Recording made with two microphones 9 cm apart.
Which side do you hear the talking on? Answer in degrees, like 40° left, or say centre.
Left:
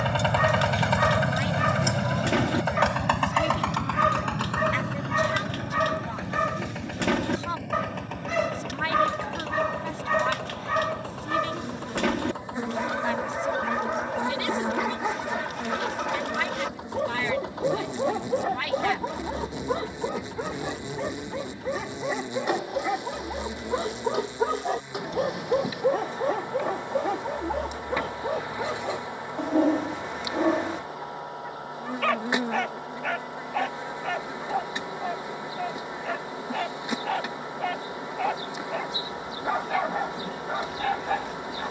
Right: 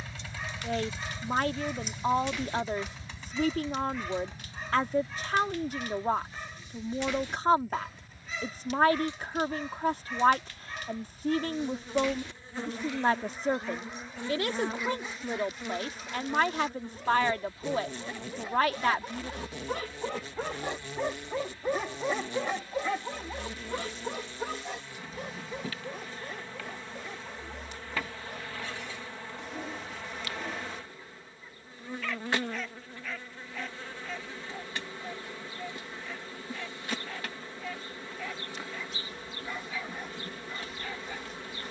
40° right.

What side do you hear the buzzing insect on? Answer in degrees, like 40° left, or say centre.
20° left.